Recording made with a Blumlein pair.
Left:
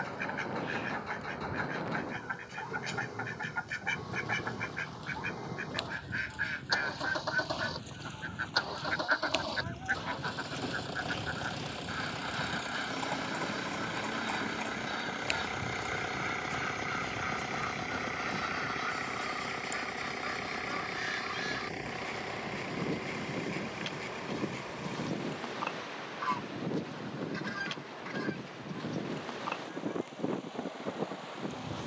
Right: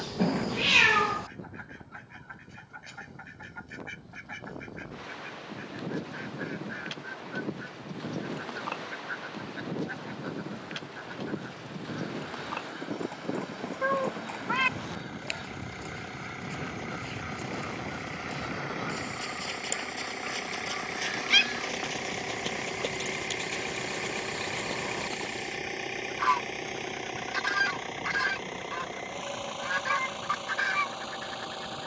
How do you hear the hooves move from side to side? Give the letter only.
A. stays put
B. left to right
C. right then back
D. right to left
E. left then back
B.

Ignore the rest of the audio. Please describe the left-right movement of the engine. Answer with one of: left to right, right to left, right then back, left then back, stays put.
left to right.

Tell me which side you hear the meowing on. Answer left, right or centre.
right.